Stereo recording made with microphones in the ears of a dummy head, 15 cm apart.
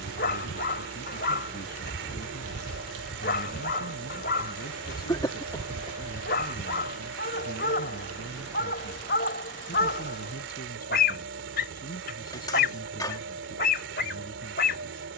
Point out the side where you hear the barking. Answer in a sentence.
You can hear the barking on the left.